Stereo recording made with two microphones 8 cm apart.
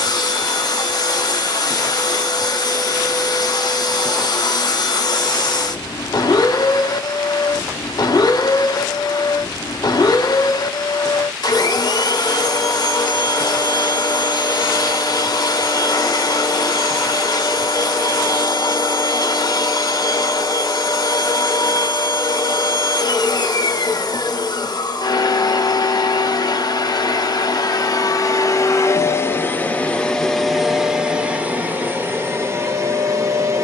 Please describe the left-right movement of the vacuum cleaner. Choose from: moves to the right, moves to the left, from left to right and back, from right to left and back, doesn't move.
moves to the right.